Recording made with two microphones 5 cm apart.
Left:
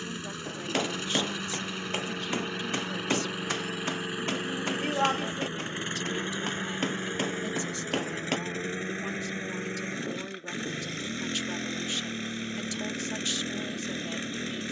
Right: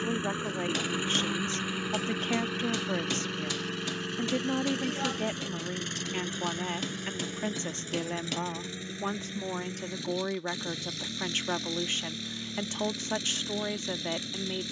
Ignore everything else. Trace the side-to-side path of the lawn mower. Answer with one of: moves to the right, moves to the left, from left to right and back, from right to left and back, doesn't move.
moves to the left.